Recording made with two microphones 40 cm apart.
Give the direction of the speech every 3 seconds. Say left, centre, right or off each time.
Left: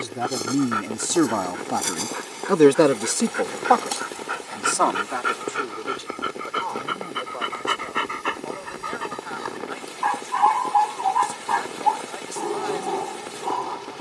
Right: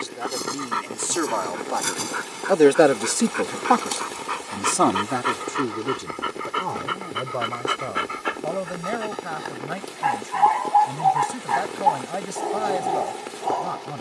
left, right, right, right, right.